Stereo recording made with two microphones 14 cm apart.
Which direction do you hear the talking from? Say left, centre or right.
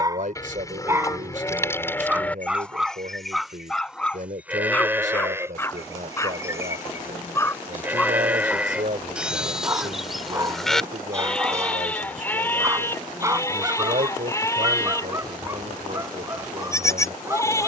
right.